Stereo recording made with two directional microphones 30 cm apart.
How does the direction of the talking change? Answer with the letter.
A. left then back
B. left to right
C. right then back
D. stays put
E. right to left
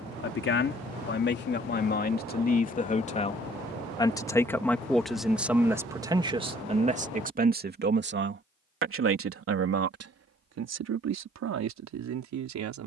B.